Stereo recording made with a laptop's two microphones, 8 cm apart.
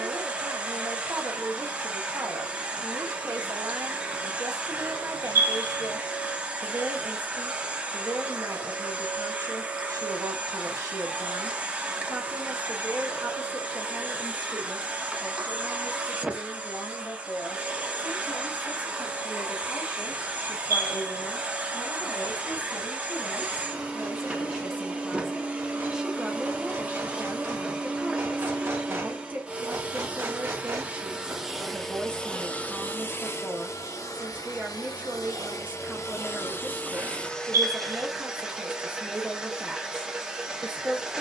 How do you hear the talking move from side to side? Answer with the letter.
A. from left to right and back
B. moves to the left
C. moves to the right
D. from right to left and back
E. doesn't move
D.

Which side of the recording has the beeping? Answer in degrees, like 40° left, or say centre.
30° right.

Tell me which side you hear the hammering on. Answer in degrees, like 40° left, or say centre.
40° right.